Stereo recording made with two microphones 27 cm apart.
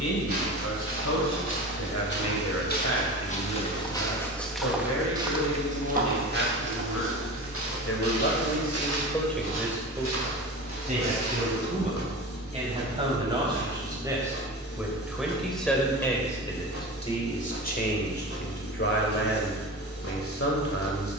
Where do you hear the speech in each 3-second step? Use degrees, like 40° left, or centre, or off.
70° left, 70° left, 60° left, 20° right, 20° right, 10° left, 50° left.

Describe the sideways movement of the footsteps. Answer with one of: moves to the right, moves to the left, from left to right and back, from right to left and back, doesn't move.
moves to the right.